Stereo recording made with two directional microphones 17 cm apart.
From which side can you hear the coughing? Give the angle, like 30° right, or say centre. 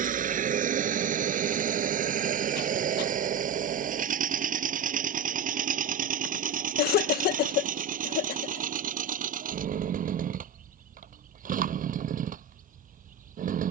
70° left.